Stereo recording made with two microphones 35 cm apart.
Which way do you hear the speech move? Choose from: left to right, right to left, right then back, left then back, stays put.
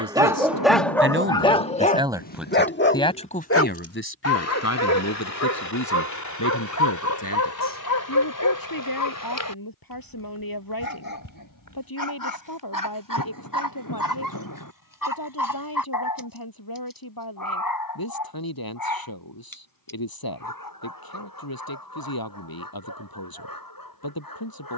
right to left.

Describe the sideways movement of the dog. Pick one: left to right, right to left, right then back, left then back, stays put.
right to left.